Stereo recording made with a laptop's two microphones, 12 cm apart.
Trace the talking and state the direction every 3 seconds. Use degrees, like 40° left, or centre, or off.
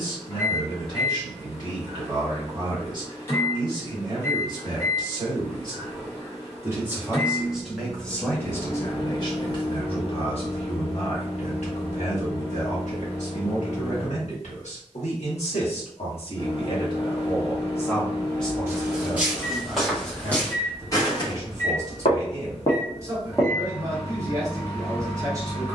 40° right, 40° right, centre, 50° left, 70° left, 50° left, 10° right, 30° right, 30° right.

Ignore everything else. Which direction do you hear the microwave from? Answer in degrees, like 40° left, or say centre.
20° left.